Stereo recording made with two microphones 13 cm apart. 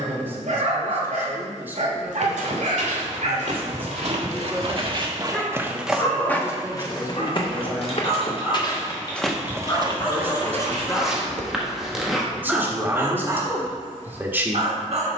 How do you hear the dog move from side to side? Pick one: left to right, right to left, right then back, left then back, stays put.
left then back.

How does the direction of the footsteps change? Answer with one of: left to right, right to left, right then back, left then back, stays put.
left then back.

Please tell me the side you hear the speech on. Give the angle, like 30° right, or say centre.
20° right.